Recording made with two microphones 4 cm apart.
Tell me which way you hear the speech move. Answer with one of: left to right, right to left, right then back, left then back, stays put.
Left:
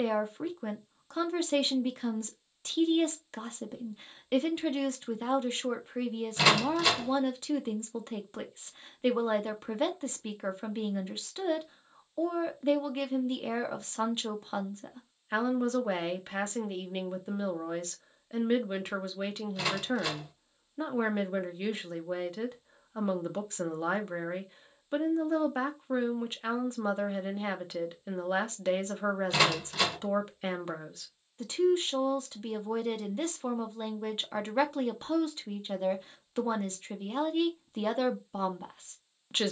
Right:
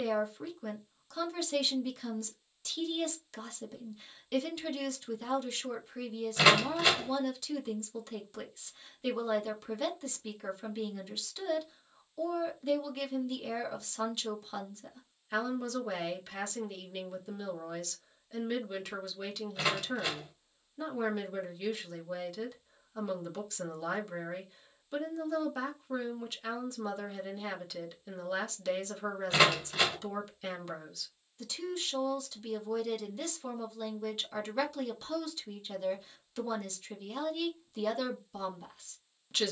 stays put.